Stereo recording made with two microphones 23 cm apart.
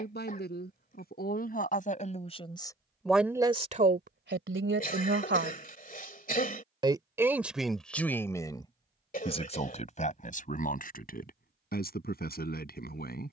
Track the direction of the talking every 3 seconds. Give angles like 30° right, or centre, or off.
40° left, 40° right, centre, 40° left, 40° left.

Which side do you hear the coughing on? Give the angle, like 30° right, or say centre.
40° left.